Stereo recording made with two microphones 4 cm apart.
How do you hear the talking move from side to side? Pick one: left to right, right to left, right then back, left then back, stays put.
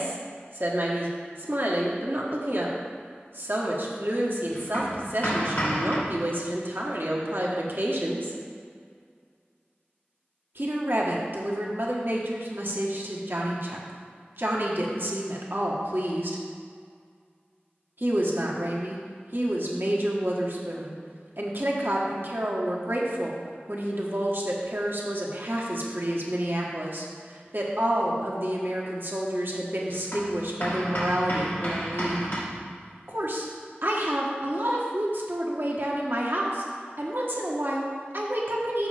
stays put.